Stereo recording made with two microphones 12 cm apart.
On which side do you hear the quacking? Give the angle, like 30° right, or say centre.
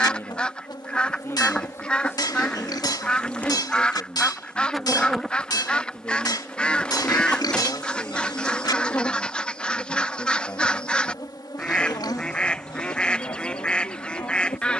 10° left.